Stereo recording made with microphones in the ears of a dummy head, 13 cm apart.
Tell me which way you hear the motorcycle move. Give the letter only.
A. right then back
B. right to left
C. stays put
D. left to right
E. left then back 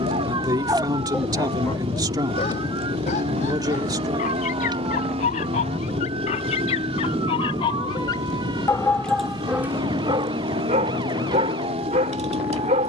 C.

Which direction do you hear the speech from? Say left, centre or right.
right.